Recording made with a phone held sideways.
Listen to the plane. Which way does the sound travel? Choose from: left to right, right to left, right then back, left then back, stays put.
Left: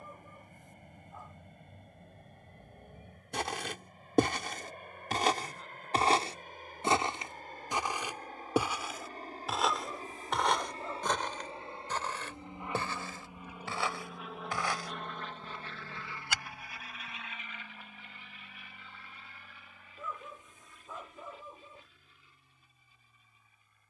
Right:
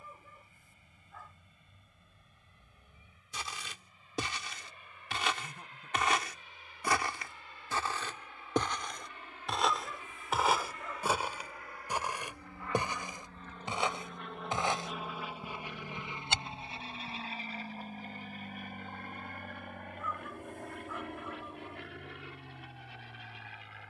left to right.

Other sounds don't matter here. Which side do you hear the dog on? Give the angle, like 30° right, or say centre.
20° left.